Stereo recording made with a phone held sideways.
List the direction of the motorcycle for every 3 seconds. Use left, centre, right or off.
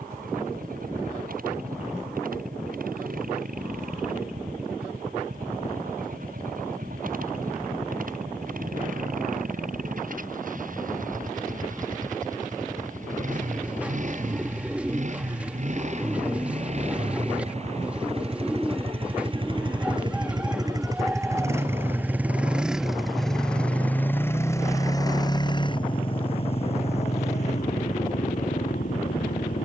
right, right, right, right, right, right, right, centre, left, left.